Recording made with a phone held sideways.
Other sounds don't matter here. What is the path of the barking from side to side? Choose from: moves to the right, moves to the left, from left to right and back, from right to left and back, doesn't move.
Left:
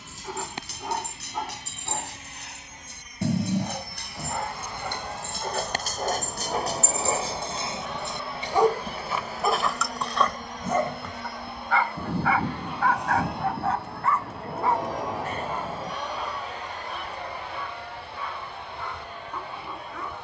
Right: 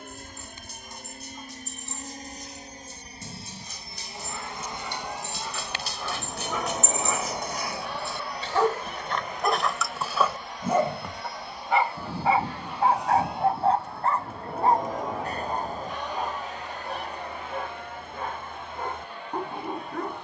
moves to the right.